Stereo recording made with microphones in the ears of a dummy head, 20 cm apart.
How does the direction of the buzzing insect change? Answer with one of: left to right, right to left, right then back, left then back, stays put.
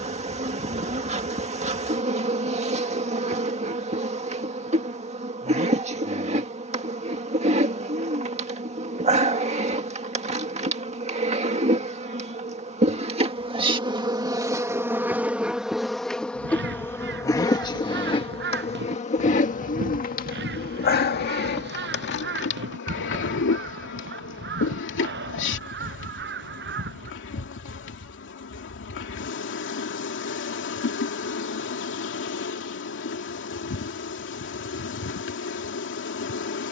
right to left.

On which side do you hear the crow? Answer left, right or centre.
right.